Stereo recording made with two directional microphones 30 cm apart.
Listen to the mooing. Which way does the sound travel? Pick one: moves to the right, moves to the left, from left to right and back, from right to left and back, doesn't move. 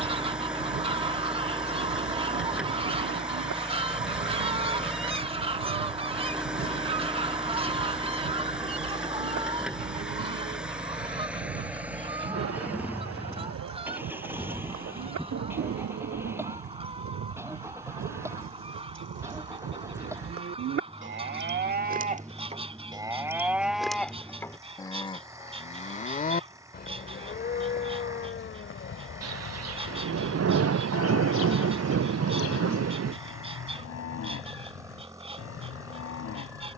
moves to the left.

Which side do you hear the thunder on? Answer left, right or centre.
right.